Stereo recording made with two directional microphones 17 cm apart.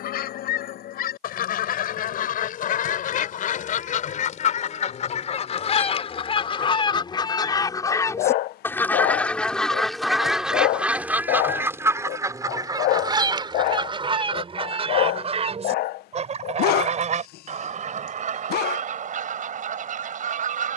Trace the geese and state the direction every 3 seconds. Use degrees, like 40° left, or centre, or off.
60° left, 50° left, 20° left, centre, 30° right, 40° right, 50° right.